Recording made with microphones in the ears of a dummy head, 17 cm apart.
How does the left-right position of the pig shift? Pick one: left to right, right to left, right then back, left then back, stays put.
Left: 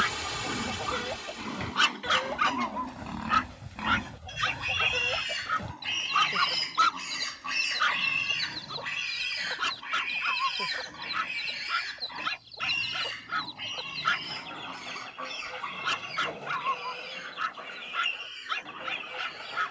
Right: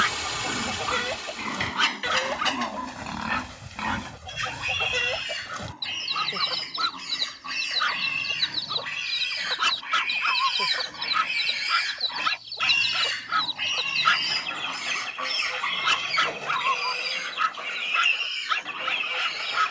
left then back.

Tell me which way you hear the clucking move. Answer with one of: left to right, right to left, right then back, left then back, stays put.
stays put.